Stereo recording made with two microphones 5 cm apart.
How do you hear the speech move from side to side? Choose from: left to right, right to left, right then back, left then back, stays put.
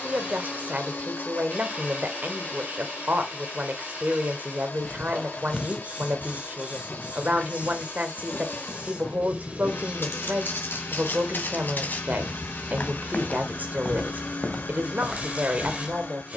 stays put.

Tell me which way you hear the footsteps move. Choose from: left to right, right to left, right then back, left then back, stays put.
left then back.